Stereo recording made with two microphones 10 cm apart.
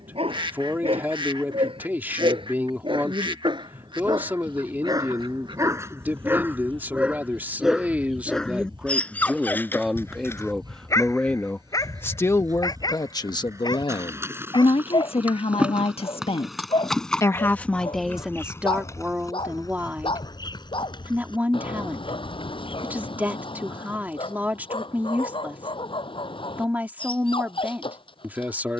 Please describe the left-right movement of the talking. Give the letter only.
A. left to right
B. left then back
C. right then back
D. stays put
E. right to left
B.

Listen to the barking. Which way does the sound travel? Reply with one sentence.
In this clip you hear the barking travel towards the left.